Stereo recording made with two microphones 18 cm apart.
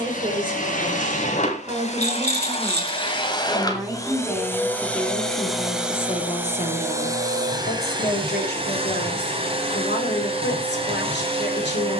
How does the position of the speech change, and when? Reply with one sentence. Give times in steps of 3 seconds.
In this clip you hear the speech on the right from 0 s, in the centre from 3 s and on the left from 6 s.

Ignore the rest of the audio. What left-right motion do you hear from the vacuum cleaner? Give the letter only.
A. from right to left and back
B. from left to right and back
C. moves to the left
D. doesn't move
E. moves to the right
E.